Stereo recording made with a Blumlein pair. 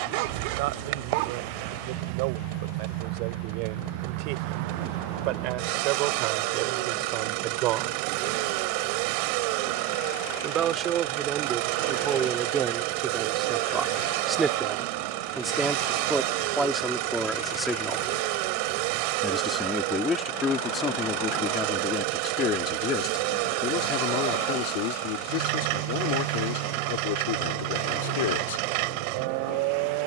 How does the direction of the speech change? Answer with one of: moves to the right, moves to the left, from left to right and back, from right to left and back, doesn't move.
moves to the left.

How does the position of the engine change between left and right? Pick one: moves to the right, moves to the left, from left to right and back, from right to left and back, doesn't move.
doesn't move.